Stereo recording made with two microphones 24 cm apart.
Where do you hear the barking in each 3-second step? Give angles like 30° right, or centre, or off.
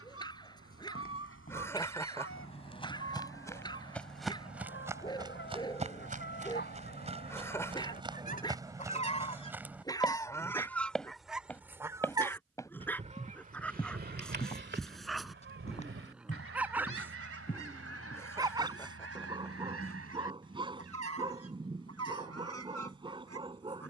20° left, 20° left, 20° left, 10° left, 10° left, 10° right, 20° right, 20° right.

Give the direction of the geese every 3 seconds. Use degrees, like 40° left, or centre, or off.
60° left, 50° left, 40° left, 10° left, 30° right, 60° right, 70° right, 80° right.